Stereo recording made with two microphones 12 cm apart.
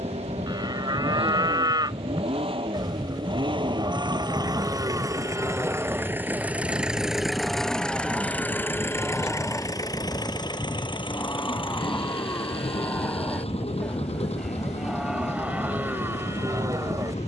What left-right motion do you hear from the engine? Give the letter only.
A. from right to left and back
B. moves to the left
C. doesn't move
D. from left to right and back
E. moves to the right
B.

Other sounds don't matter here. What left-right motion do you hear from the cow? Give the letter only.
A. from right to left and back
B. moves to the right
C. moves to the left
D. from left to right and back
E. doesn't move
A.